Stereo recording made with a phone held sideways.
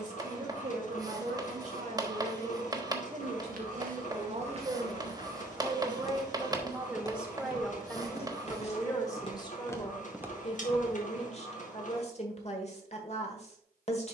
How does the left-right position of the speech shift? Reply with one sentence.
You can hear the speech move to the left.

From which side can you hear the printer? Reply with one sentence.
You can hear the printer on the left.